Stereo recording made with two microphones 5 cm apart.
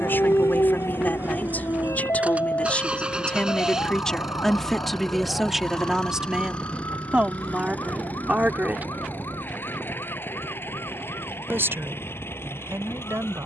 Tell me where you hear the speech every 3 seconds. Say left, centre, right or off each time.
left, centre, right, right, right.